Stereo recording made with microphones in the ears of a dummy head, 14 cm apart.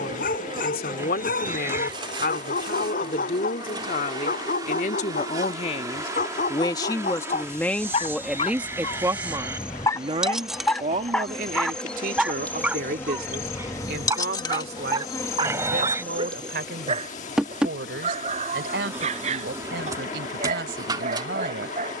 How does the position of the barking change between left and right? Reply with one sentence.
In this clip you hear the barking go from the left side to the right.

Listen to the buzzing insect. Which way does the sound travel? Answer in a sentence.
In this clip you hear the buzzing insect go left and come back.